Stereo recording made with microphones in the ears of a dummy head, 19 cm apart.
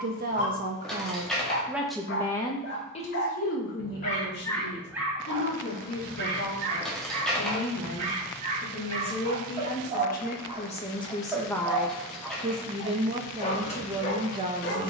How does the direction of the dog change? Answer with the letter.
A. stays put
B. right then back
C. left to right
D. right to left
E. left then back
B.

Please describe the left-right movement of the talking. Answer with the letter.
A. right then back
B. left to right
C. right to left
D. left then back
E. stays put
D.